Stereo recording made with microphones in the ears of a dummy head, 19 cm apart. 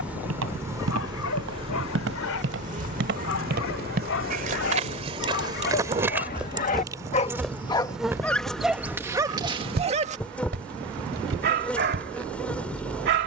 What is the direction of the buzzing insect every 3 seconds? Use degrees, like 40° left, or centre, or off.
20° right, 40° right, 10° right, 10° left, 10° left.